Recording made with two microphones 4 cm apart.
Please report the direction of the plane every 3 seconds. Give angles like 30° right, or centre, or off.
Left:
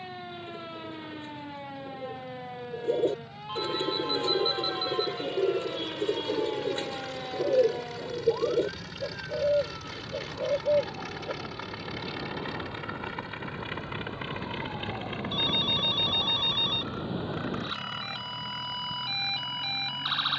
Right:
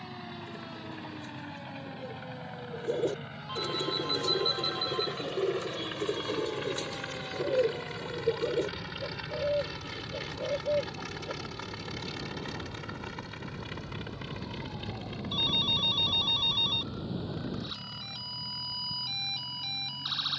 60° right, 50° right, 30° right, centre, 20° left, 40° left, 50° left.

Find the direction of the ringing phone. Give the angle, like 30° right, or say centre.
10° left.